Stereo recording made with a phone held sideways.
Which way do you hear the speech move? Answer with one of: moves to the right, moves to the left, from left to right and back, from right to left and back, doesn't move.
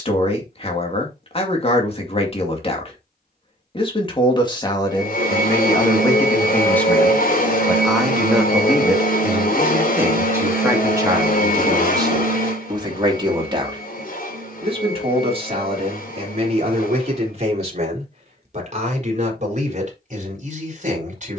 moves to the right.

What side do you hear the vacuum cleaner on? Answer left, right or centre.
left.